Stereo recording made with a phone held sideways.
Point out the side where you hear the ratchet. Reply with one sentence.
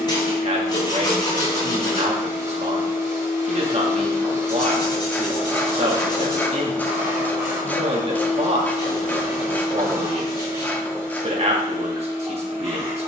In this clip you hear the ratchet in the centre.